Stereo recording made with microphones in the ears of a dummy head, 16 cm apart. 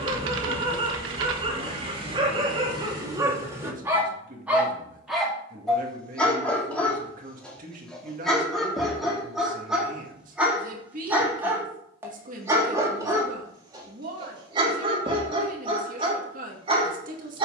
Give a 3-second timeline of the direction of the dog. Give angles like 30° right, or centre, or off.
30° right, 10° right, centre, 10° right, 20° right, 30° right.